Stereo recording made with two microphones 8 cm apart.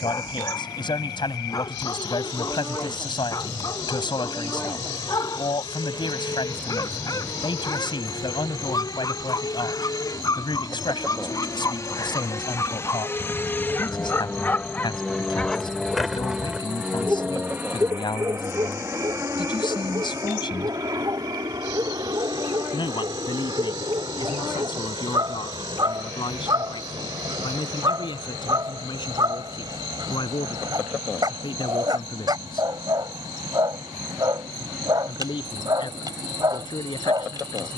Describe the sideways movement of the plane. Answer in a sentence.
In this clip you hear the plane go from the left side to the right.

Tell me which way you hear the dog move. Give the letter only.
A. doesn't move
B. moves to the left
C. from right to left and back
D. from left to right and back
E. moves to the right
E.